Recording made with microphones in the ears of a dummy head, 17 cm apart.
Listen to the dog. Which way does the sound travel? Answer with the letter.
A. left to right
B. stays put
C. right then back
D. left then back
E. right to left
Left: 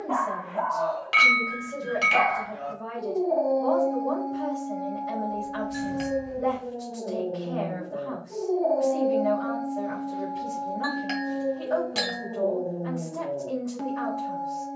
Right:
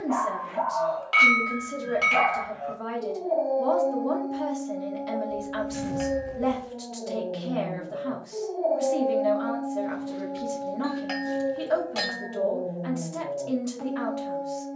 B.